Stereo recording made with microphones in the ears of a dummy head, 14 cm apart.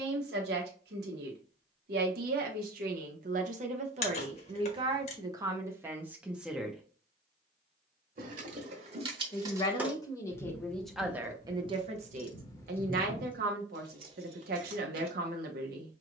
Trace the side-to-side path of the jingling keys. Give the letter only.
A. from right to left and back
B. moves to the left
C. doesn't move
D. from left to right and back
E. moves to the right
A.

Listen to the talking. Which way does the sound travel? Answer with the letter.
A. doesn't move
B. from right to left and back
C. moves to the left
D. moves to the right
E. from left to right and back
B.